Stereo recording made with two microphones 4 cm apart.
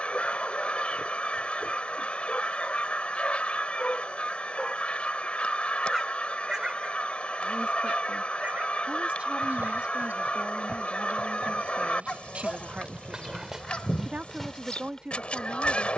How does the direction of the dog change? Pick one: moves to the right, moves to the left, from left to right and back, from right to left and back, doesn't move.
from left to right and back.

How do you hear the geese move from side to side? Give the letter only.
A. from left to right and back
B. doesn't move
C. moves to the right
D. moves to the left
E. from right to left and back
B.